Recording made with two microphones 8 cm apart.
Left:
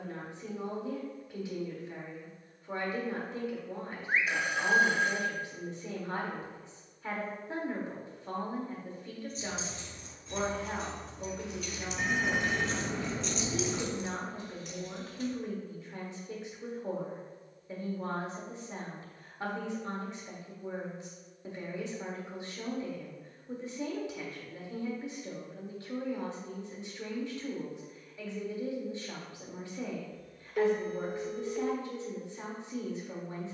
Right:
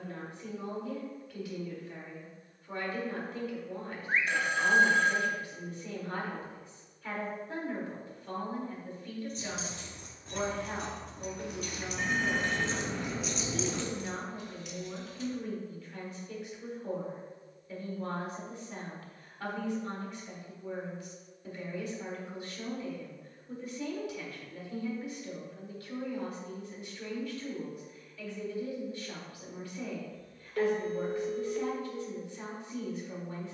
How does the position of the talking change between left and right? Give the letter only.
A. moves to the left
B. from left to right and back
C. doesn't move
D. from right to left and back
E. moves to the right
C.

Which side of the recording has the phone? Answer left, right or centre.
centre.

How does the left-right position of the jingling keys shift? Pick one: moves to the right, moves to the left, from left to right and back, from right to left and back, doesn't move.
moves to the left.